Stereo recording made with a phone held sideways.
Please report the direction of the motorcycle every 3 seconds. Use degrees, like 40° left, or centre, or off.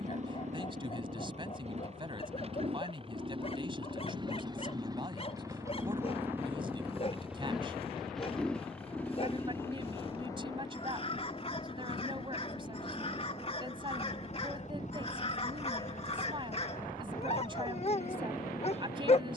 40° right, 30° right, centre, 20° left, 40° left, 50° left, 60° left.